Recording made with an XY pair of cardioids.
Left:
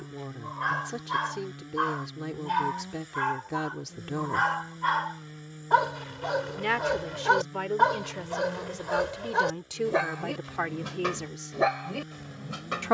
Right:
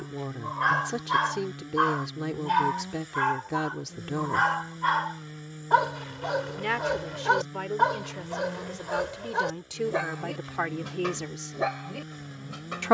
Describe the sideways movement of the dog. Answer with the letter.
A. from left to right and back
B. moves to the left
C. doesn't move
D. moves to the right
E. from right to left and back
B.